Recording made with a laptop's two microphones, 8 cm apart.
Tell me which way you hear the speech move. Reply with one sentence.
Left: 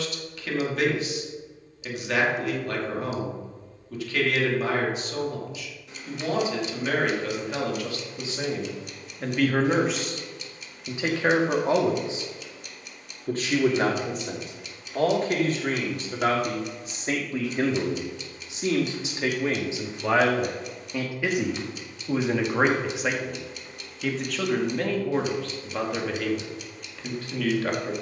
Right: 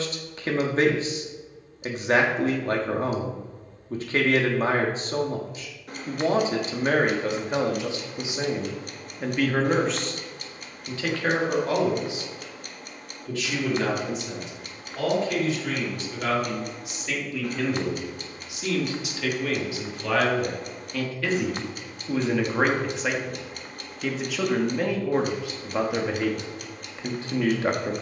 You can hear the speech move from right to left and back again.